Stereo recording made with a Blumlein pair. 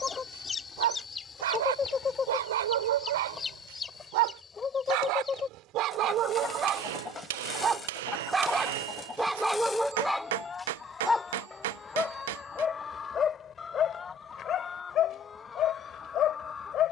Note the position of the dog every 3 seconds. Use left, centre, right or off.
right, right, right, centre, left, left.